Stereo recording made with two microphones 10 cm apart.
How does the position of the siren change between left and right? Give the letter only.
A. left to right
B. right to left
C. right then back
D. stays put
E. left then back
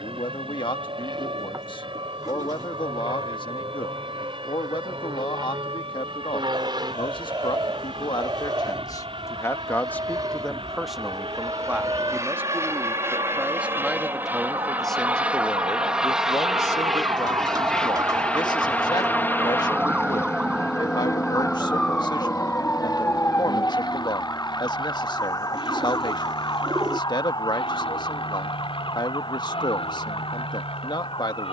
B.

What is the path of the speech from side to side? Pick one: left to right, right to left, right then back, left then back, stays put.
right then back.